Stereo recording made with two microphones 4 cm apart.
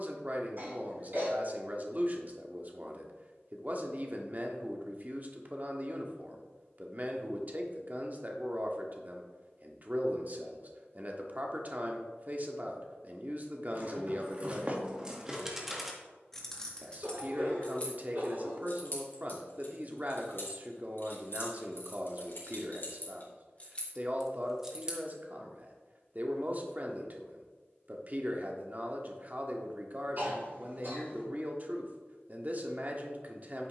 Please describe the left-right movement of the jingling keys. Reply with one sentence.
You can hear the jingling keys go left and come back.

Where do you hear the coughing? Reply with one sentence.
You can hear the coughing on the right.